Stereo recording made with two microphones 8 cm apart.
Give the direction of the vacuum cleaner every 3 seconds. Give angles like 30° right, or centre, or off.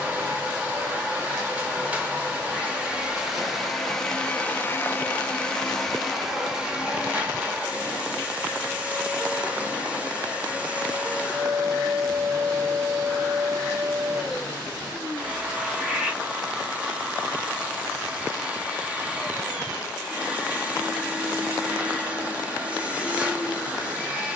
20° right, 10° left, 10° right, 20° right, 20° right, 20° right, 20° right, 20° right.